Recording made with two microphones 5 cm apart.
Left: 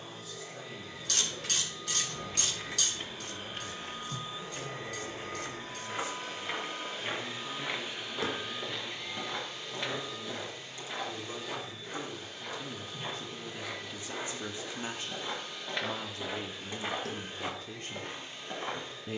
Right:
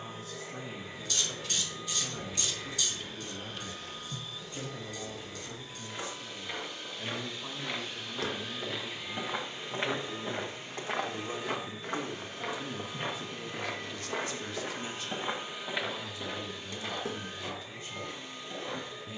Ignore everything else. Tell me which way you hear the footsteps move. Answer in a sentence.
You can hear the footsteps go right and come back.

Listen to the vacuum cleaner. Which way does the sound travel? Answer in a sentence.
In this clip you hear the vacuum cleaner move from right to left and back again.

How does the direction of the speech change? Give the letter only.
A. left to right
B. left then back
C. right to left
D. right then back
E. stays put
C.